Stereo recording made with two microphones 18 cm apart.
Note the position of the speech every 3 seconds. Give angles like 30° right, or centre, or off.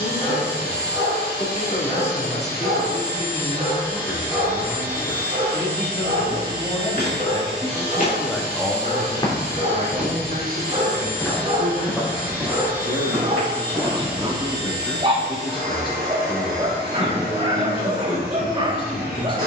40° left, 40° left, 20° left, 50° right, 20° right, 30° left, 30° left.